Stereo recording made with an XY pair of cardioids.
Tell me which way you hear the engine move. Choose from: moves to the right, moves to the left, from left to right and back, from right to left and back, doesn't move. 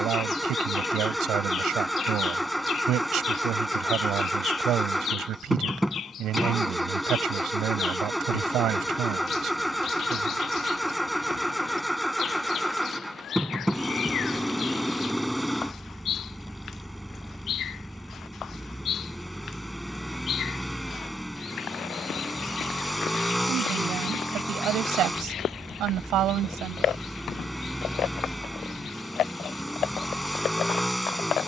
doesn't move.